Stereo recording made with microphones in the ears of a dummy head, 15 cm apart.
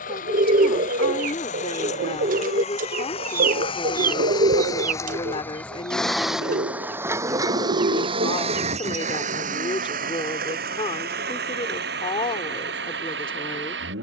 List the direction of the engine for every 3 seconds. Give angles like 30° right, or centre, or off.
50° left, 20° left, 20° right, 60° right, 70° right.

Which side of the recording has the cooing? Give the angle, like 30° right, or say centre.
50° right.